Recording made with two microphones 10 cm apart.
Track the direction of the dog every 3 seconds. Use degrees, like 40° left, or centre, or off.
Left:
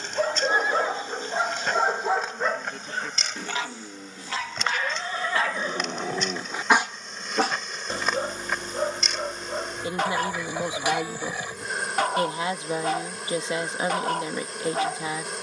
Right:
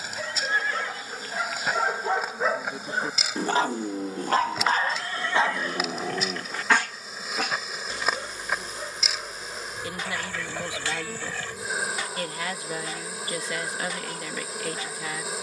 20° left, 30° right, 30° left, 60° left, 60° left.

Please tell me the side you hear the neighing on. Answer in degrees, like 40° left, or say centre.
20° left.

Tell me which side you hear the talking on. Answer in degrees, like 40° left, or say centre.
30° left.